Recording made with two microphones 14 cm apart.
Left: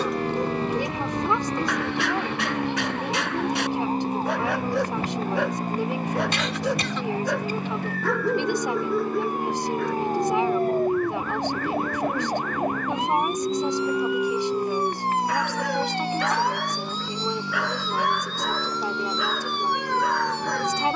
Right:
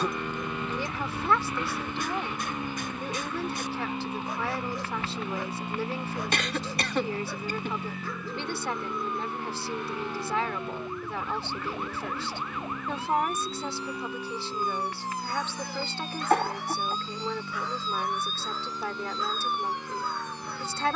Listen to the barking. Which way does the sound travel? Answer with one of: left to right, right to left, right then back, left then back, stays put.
stays put.